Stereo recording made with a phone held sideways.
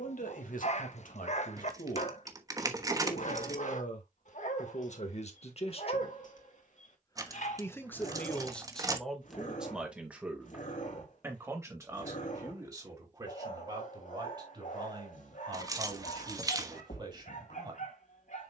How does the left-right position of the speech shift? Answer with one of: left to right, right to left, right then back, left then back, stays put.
left to right.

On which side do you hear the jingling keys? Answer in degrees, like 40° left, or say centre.
30° right.